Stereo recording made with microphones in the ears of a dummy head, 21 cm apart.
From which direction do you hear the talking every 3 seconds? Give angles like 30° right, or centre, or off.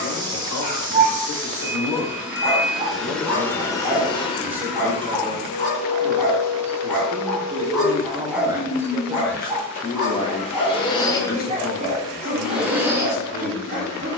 60° left, centre, 30° right, 20° left, 50° left.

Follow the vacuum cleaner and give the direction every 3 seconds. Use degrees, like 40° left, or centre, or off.
10° right, 30° left, 60° left, 30° left, 10° right.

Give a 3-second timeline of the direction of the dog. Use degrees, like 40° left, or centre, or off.
40° right, centre, centre, 20° right, 40° right.